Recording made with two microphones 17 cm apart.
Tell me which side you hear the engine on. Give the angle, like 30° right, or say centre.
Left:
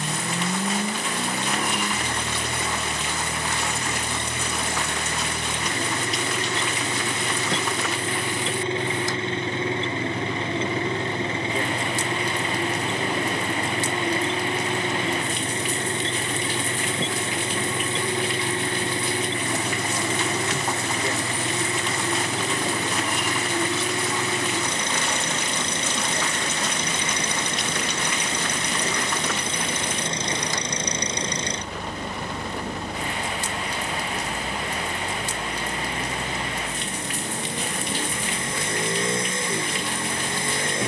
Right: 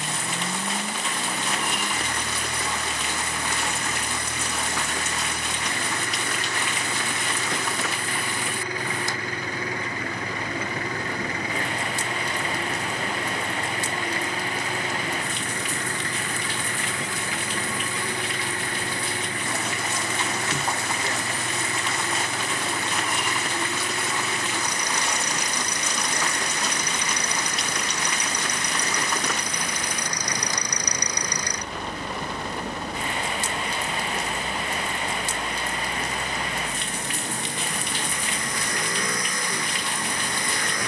20° left.